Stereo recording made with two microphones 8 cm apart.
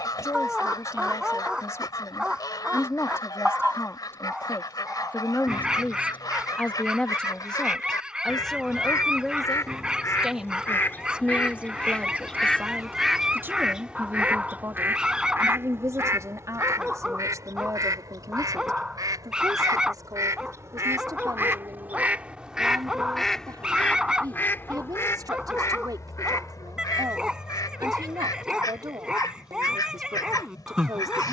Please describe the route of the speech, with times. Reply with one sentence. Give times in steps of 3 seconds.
In this clip you hear the speech on the left from 0 s, in the centre from 6 s and on the right from 12 s.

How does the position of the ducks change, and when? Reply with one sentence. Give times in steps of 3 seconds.
In this clip you hear the ducks on the left from 0 s, in the centre from 12 s, on the right from 15 s, in the centre from 21 s and on the left from 24 s.